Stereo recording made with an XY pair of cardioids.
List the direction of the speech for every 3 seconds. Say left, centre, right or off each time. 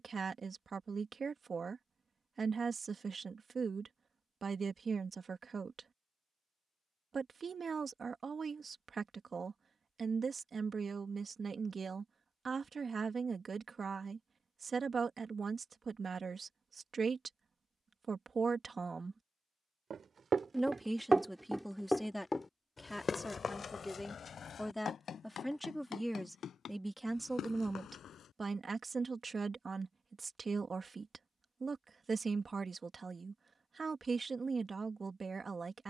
right, right, right, right, right, right, right, centre, centre, right, right, right.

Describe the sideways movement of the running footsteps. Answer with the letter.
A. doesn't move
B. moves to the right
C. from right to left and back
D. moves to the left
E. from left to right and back
D.